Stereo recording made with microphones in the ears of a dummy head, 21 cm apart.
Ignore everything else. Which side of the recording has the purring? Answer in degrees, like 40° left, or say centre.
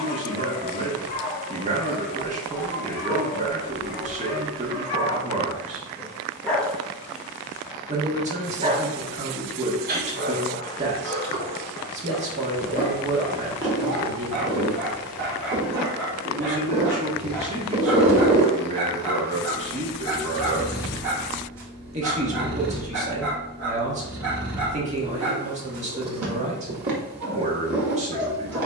50° right.